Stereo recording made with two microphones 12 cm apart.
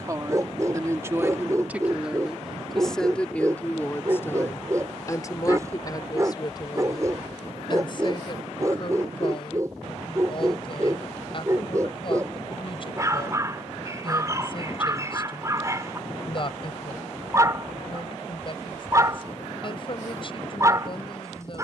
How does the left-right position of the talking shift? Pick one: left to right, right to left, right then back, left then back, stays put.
right to left.